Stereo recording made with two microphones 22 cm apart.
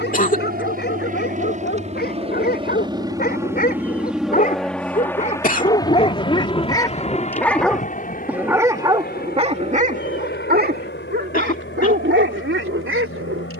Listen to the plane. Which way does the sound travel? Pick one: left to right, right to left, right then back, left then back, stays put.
right to left.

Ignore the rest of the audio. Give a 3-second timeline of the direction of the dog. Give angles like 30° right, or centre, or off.
50° left, 40° left, 10° left, 40° right, 70° right.